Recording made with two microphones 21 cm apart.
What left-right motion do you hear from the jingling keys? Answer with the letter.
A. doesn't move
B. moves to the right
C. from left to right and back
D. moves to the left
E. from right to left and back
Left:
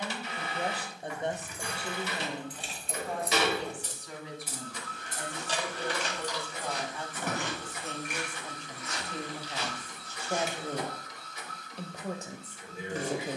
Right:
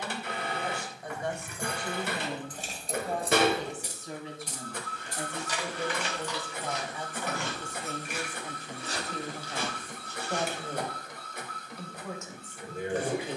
D.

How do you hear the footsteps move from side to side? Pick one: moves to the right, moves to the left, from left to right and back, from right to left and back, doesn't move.
moves to the right.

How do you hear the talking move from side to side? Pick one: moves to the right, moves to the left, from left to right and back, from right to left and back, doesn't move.
from left to right and back.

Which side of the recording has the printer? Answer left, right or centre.
right.